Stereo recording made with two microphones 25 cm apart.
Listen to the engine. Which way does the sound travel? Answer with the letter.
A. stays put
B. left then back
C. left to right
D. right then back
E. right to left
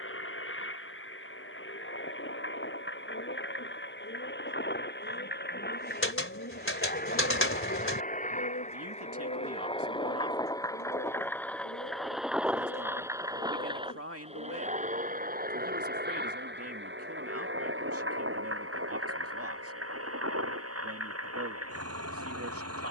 C.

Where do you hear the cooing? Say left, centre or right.
left.